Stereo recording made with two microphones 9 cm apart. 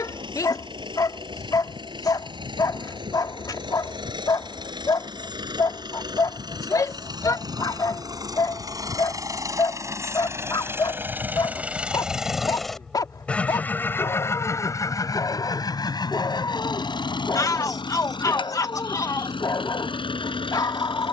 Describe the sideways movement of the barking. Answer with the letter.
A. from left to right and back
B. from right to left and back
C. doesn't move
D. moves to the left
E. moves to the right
C.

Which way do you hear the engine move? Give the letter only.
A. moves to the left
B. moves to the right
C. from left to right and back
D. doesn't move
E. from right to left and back
A.